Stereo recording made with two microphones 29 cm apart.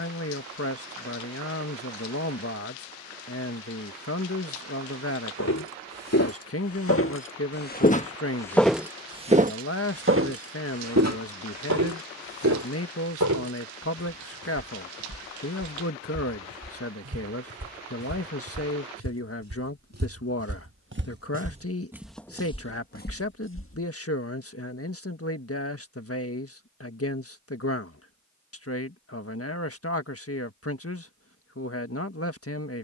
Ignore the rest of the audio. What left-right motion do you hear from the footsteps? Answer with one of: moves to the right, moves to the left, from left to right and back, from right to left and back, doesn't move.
from left to right and back.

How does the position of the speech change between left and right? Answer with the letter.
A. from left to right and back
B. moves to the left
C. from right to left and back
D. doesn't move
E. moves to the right
D.